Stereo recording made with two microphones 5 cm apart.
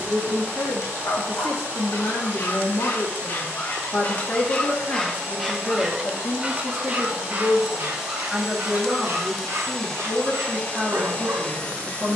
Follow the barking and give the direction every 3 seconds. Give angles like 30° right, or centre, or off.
50° left, 20° left, 40° right, 60° right.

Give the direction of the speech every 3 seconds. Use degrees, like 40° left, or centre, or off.
60° left, 40° left, 10° left, 10° right.